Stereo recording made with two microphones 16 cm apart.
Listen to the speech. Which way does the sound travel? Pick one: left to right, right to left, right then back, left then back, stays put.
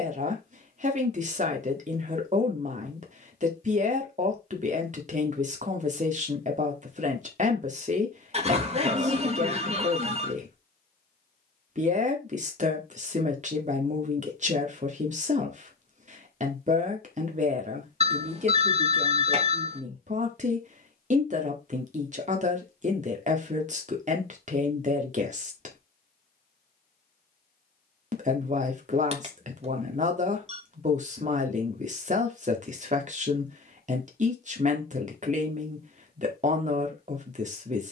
stays put.